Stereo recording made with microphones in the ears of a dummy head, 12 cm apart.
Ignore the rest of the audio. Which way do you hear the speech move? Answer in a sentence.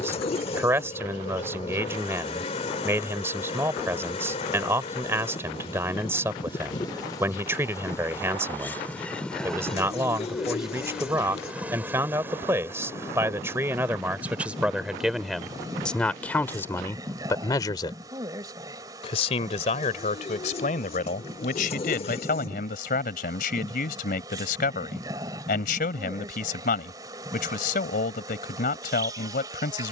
You can hear the speech move to the left.